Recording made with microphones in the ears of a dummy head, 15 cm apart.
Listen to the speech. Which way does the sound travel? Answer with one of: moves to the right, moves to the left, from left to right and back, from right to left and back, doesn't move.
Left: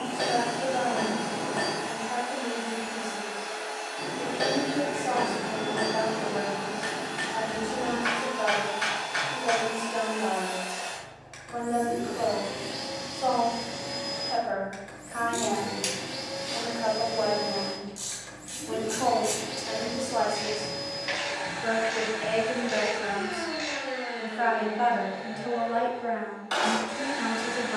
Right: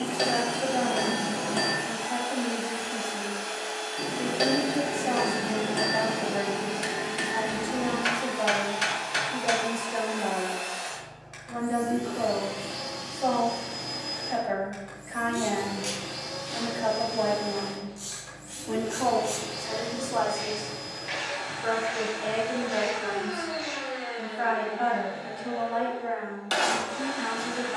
moves to the left.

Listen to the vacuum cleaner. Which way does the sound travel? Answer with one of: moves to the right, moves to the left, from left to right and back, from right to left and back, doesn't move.
moves to the left.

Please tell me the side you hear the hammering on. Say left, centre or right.
right.